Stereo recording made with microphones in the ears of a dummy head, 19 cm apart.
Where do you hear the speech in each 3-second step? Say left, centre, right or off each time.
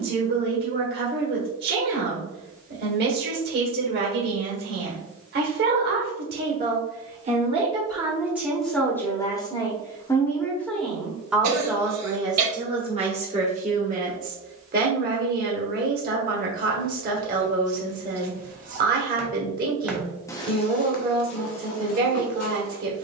right, right, right, centre, right, right, right, right.